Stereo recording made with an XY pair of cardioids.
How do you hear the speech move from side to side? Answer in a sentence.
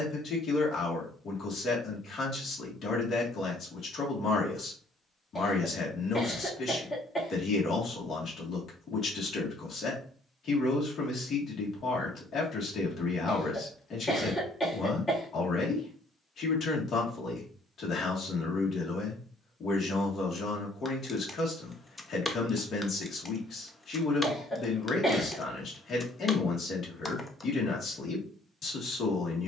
In this clip you hear the speech stay in one place.